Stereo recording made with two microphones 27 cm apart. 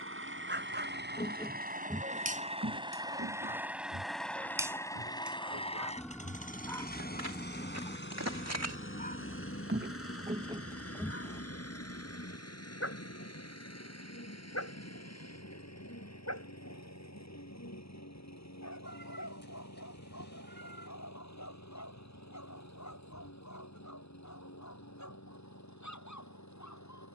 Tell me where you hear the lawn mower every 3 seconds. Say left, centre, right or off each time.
right, centre, left, left, left, left, left, left, left.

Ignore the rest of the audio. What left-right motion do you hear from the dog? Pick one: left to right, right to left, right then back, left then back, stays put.
right to left.